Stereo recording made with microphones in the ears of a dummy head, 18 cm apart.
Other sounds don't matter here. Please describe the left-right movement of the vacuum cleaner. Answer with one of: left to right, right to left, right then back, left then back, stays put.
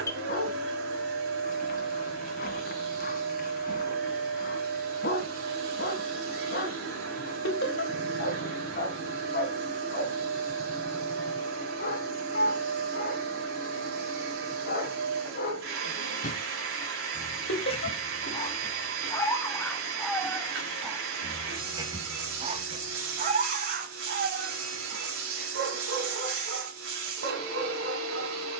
stays put.